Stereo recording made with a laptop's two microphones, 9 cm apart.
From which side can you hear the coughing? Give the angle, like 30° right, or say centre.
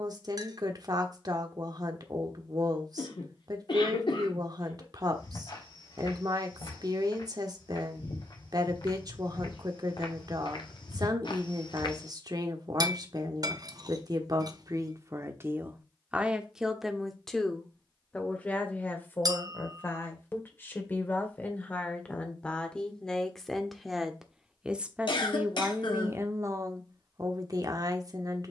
60° left.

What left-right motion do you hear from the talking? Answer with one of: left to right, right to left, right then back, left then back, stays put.
left then back.